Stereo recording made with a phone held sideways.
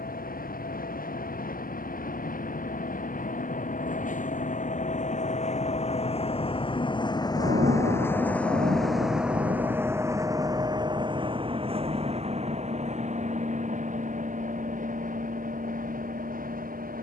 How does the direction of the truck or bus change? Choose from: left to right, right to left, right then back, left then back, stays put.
left to right.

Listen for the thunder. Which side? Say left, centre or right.
right.